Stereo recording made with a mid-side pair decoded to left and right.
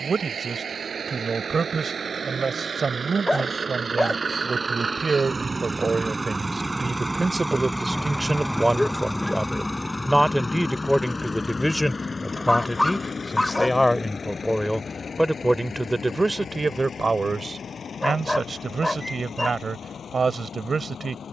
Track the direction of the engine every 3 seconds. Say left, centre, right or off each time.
right, right, centre, left, left, left, left.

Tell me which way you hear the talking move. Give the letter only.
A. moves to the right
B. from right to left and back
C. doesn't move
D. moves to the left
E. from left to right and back
B.